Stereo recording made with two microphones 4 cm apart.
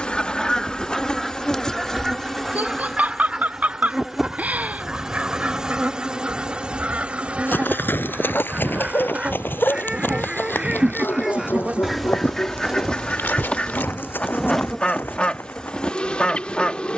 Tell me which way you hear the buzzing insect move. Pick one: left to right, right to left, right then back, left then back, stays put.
right then back.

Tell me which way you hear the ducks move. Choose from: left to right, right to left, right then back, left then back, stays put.
right then back.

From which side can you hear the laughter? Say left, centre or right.
right.